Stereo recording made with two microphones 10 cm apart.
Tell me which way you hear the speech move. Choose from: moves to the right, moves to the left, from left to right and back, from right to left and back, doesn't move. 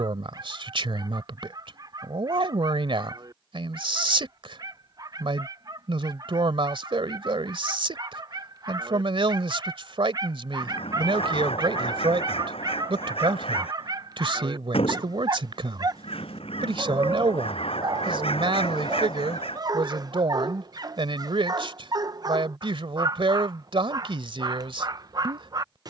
doesn't move.